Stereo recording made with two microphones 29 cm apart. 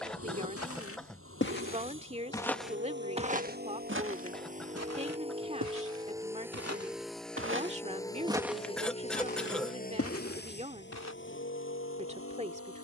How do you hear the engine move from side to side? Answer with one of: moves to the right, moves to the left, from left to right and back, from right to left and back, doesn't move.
moves to the left.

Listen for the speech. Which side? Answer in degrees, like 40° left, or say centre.
20° right.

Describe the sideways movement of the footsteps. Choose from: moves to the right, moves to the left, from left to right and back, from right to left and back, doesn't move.
from left to right and back.